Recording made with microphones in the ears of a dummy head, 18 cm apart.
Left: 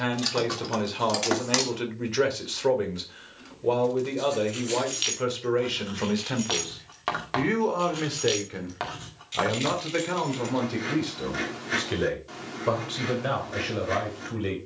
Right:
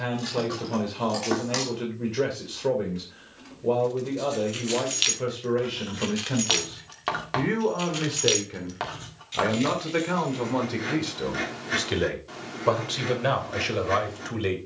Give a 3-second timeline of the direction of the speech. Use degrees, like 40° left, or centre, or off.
50° left, 50° left, 30° left, 10° right, 30° right.